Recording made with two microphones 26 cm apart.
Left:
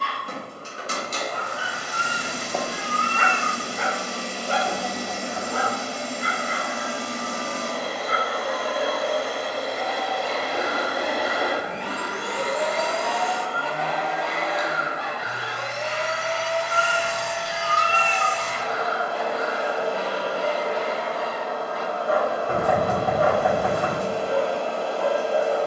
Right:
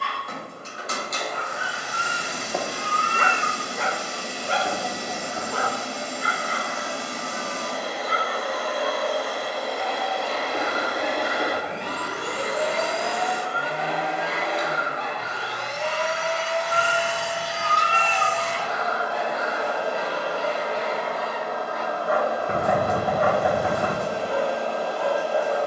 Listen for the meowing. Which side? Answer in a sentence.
In this clip you hear the meowing on the right.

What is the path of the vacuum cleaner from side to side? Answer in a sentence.
You can hear the vacuum cleaner move from left to right and back again.